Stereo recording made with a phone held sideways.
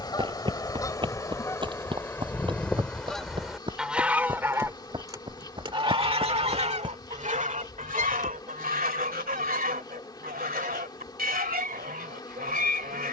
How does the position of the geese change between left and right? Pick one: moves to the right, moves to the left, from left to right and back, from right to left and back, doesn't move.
moves to the right.